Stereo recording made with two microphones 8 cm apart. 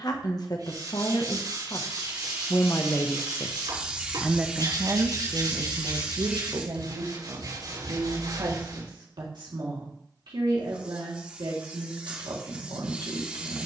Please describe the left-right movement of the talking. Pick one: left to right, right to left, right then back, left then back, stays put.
left to right.